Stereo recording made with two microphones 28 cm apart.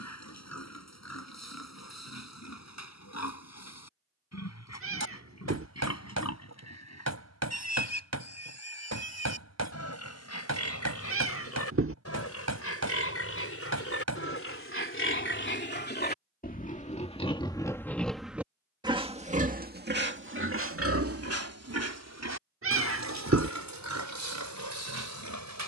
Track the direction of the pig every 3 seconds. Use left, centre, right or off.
left, left, left, left, left, left, right, right, right.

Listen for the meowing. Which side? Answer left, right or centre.
right.